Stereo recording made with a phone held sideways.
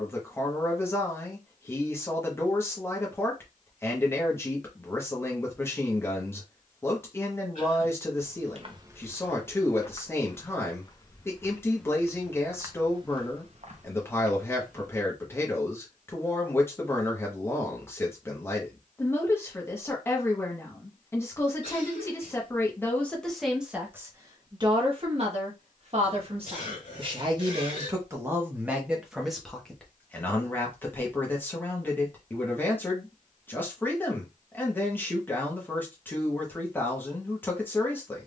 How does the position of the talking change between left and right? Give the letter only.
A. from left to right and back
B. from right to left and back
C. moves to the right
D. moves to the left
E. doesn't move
A.